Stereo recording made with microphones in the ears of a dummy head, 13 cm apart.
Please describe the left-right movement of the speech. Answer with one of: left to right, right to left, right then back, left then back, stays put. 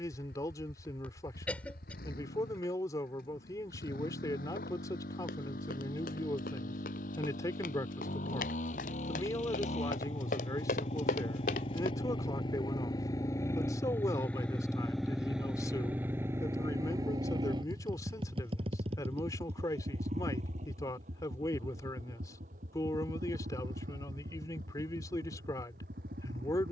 stays put.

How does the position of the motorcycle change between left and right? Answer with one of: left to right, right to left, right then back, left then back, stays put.
left to right.